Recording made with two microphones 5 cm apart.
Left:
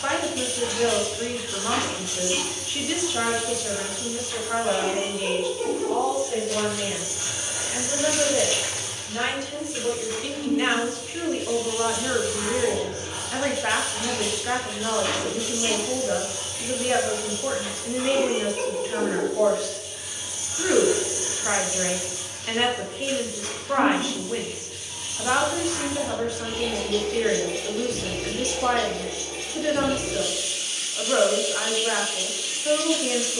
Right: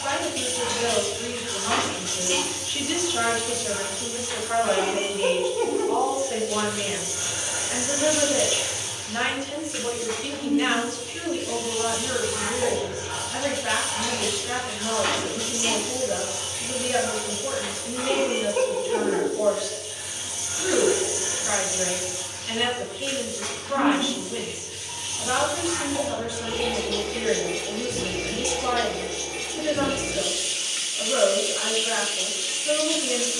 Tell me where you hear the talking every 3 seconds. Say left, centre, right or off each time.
left, centre, right, centre, left, left, left, left, left, left, left.